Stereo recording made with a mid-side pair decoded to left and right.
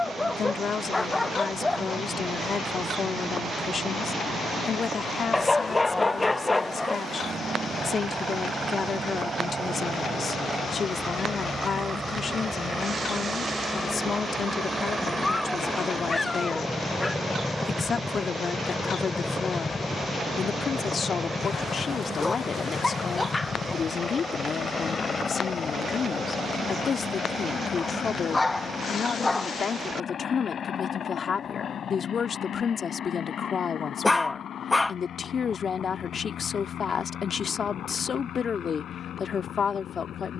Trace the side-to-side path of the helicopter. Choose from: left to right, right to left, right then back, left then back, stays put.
right to left.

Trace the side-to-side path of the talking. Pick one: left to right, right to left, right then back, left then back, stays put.
stays put.